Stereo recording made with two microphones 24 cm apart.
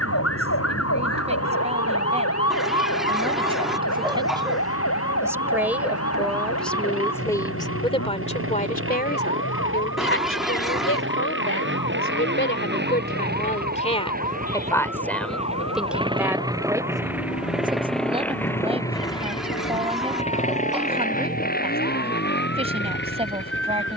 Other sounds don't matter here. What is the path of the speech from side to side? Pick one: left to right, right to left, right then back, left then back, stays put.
left then back.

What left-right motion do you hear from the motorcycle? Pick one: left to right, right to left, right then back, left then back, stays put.
right to left.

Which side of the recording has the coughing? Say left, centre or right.
centre.